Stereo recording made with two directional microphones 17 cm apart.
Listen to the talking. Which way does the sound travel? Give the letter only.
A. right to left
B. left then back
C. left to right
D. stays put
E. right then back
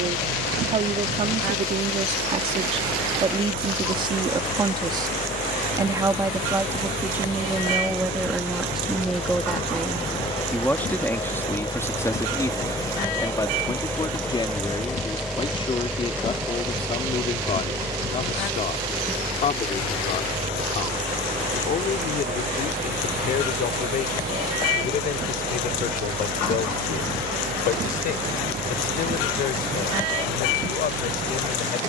A.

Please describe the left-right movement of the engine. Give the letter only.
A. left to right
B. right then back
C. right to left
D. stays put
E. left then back
A.